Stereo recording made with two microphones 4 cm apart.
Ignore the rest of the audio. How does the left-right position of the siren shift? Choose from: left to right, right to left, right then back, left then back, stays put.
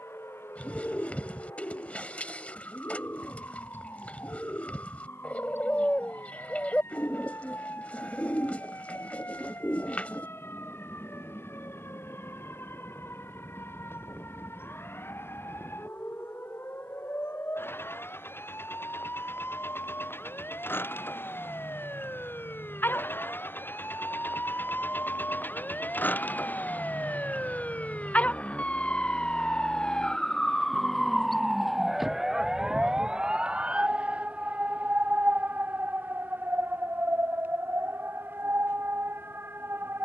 left to right.